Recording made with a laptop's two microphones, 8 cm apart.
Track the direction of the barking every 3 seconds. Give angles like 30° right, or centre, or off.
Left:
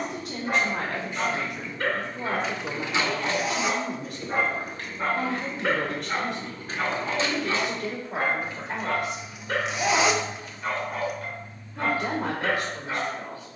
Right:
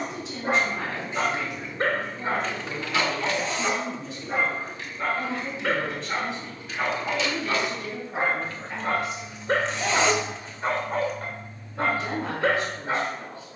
40° right, centre, 20° right, 40° right, 40° right.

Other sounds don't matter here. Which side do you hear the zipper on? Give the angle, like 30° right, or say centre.
10° left.